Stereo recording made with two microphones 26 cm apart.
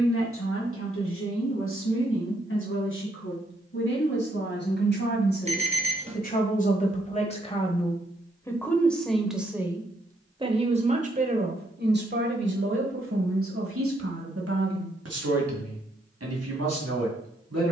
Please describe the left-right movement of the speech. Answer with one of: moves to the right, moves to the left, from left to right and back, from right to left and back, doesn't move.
moves to the right.